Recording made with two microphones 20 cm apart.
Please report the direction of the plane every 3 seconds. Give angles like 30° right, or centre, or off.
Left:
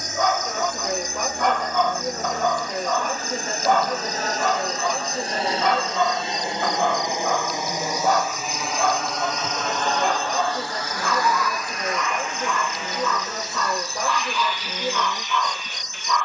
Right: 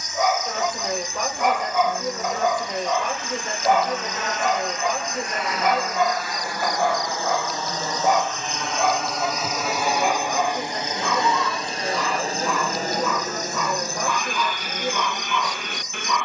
50° left, 40° left, 20° left, 20° right, 40° right, 60° right.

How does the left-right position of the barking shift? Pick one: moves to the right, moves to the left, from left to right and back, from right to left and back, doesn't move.
doesn't move.